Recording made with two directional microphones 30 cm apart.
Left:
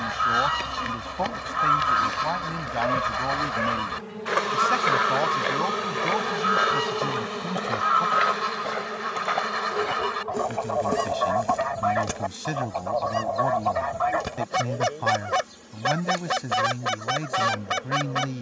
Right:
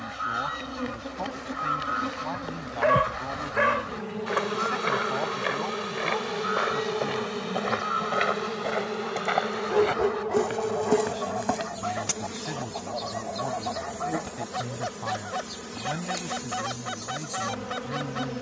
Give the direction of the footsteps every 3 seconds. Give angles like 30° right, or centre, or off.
50° left, 20° left, centre, 20° right, off, off.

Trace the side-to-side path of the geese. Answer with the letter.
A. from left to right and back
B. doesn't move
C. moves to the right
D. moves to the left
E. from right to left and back
B.